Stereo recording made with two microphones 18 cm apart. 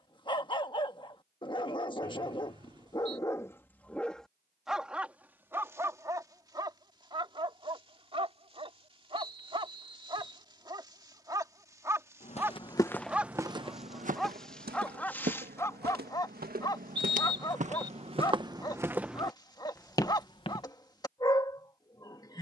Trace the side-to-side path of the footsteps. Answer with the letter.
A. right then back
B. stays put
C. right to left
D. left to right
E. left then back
A.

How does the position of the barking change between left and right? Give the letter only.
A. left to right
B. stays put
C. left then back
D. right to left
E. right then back
E.